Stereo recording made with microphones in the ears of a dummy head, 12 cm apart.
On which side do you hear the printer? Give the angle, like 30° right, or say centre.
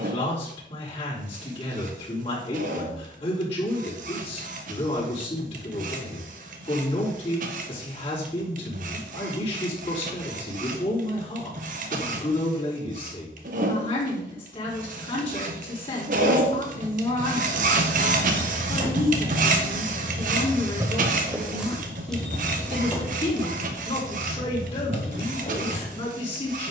60° right.